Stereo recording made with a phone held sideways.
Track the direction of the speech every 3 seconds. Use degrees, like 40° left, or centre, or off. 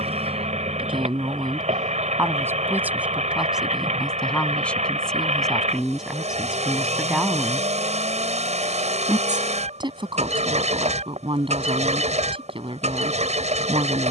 30° right, centre, 10° right, 30° right, 40° right.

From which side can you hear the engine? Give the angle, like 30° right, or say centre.
50° right.